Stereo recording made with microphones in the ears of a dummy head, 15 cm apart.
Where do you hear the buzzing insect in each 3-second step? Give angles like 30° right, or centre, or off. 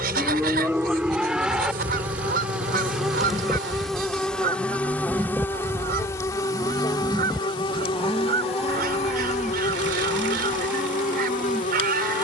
10° right, 10° left, 30° left, 40° left.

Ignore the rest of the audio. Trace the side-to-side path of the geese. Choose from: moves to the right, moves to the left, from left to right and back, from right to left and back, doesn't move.
doesn't move.